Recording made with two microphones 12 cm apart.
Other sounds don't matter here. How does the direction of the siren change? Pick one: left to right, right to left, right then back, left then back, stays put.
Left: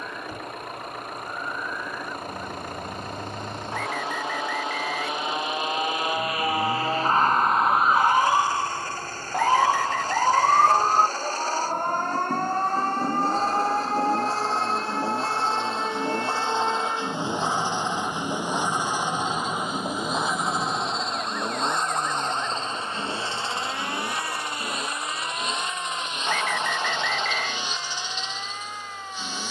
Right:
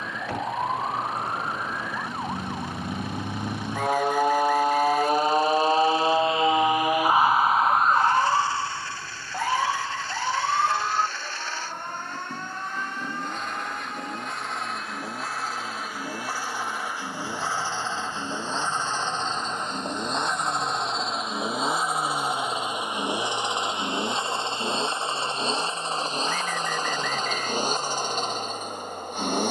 right to left.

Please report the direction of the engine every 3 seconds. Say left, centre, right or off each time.
left, left, left, left, left, left, centre, centre, right, right.